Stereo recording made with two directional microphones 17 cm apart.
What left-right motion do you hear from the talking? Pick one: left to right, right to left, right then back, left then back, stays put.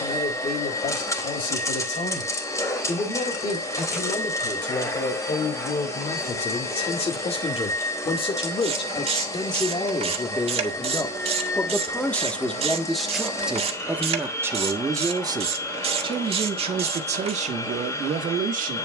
left to right.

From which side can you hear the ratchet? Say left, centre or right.
right.